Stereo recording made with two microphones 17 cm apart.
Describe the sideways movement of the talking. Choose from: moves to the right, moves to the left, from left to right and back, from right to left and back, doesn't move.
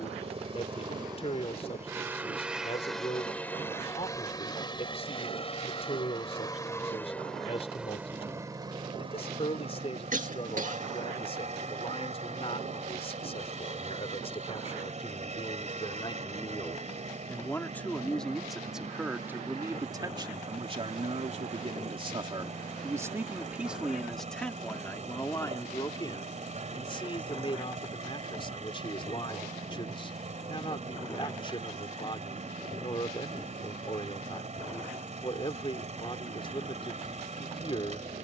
from left to right and back.